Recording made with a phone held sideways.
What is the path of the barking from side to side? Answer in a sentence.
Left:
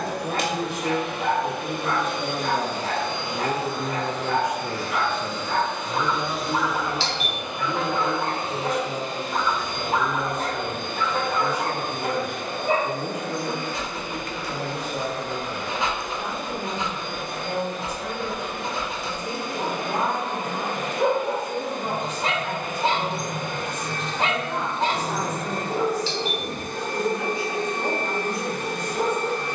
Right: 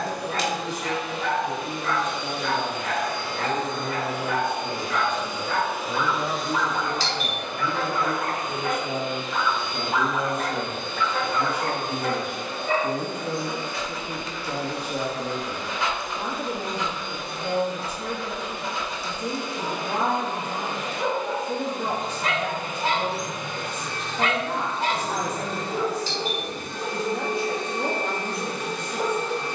In this clip you hear the barking stay in one place.